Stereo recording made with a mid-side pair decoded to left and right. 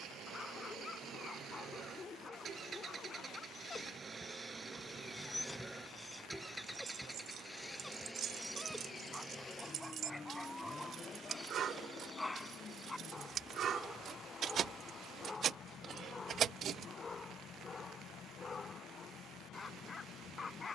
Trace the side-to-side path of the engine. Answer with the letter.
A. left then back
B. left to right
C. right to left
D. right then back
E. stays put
C.